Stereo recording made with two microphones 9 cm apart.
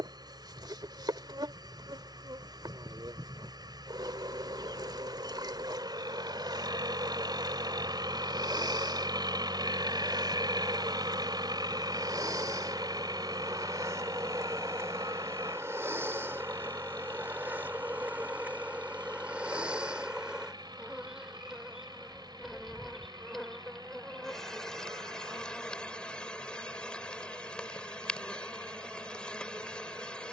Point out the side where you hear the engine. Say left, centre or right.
right.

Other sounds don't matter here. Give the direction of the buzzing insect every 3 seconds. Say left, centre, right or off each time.
right, right, right, right, right, right, centre, centre, centre, centre.